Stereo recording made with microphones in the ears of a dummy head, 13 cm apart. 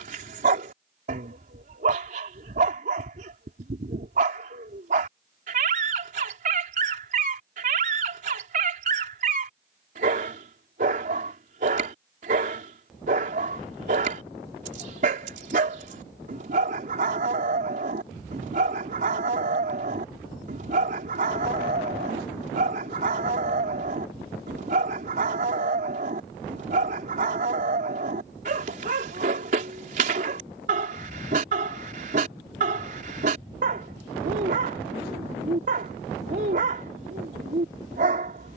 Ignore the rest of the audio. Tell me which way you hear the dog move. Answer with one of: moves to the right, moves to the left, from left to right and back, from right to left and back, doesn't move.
doesn't move.